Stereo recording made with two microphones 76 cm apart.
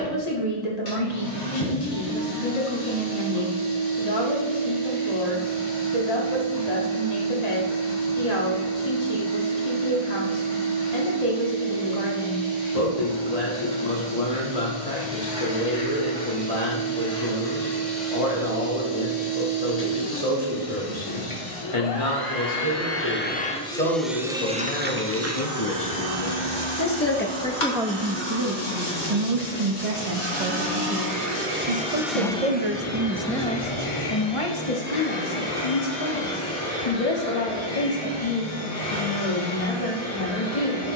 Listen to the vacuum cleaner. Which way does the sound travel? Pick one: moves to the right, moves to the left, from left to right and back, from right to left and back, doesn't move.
from left to right and back.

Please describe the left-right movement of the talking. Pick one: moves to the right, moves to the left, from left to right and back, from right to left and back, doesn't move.
from left to right and back.